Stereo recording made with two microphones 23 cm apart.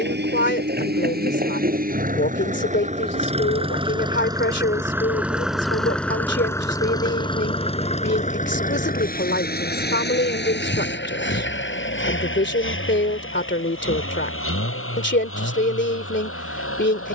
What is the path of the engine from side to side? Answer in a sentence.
In this clip you hear the engine go from the right side to the left.